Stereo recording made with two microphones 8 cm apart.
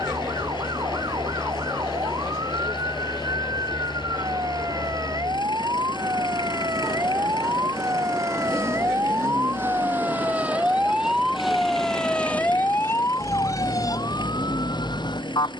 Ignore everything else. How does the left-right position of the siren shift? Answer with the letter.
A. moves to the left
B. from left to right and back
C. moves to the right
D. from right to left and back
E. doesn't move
A.